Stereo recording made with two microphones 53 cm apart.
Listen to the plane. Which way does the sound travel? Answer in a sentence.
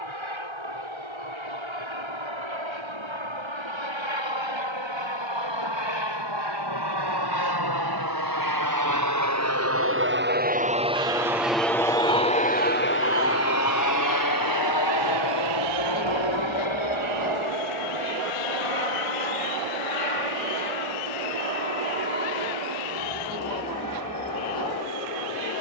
In this clip you hear the plane move to the left.